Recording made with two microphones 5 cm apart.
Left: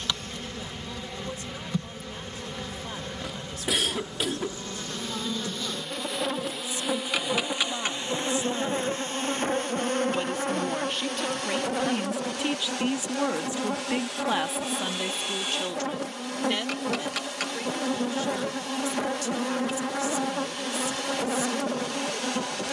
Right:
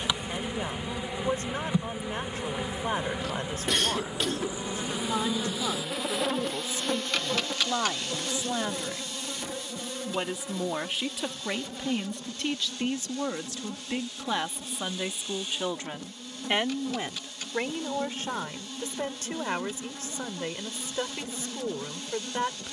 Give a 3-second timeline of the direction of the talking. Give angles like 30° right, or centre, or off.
40° right, 40° right, 30° right, 10° right, 10° left, 30° right, 40° right, 40° right.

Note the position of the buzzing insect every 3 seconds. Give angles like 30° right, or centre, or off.
20° right, 10° right, 20° left, 60° left, 80° left, 80° left, 80° left, 80° left.